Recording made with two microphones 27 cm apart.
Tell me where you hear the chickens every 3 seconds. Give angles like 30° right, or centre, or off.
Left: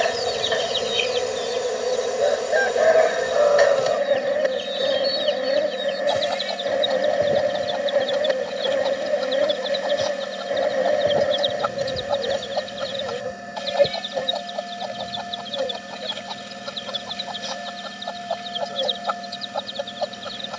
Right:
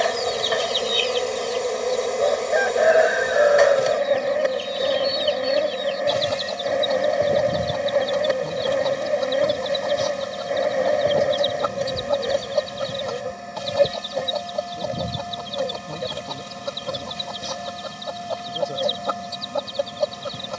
20° left, 30° right, 50° right, 50° right, 50° right, 50° right, 50° right.